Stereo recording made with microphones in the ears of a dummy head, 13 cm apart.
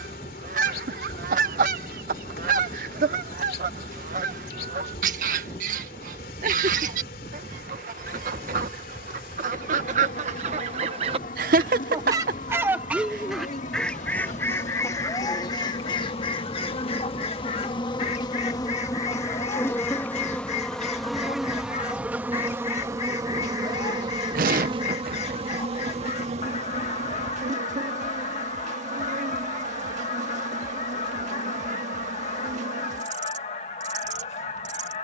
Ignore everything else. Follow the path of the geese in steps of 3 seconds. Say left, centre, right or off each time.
right, right, right, right, centre, left, left, left, left, left, left, left.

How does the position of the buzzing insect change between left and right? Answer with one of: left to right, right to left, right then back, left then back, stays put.
left to right.